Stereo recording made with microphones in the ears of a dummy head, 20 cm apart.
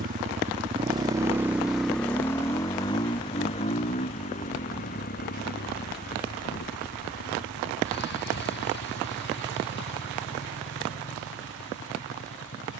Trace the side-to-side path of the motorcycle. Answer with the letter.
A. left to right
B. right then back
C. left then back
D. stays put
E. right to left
E.